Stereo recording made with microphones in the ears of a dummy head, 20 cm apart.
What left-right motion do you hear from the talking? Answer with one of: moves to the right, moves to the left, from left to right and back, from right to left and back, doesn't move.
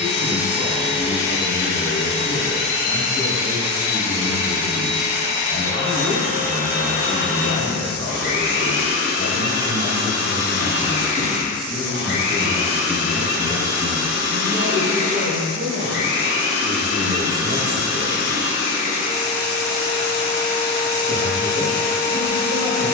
moves to the right.